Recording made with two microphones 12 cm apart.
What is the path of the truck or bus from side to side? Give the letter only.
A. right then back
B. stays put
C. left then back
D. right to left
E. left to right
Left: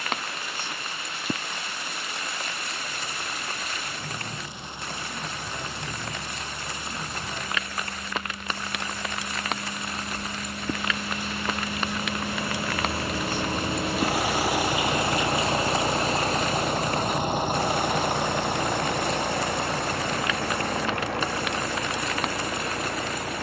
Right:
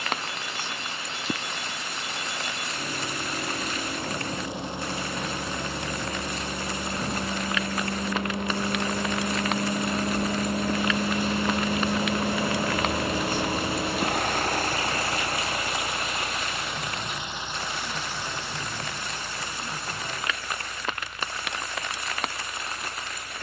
D.